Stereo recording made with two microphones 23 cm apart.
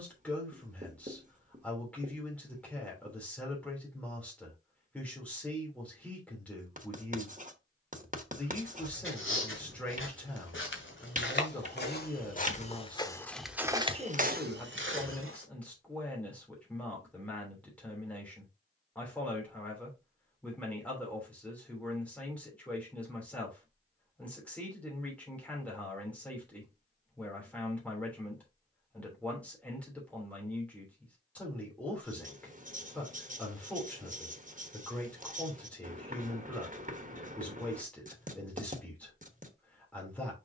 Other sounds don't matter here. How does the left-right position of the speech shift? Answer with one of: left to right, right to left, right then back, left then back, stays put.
stays put.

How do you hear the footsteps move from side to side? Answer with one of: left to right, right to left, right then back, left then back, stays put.
left to right.